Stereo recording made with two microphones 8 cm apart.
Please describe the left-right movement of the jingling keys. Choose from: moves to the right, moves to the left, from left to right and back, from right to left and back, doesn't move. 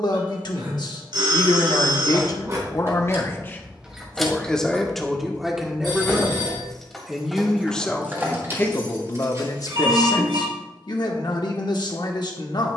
from right to left and back.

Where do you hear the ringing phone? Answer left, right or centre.
right.